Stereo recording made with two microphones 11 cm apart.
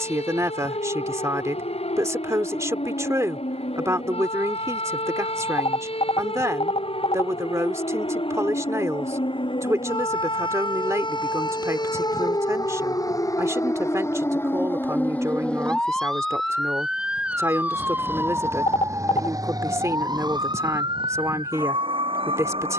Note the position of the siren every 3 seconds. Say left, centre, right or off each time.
left, left, left, left, left, centre, right, right.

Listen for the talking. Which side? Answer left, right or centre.
right.